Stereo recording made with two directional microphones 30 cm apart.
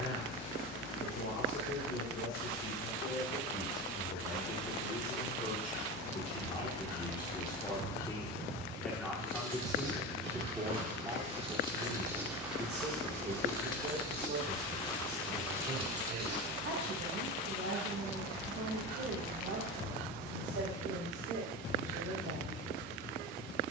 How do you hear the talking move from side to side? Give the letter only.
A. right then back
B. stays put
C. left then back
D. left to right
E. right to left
D.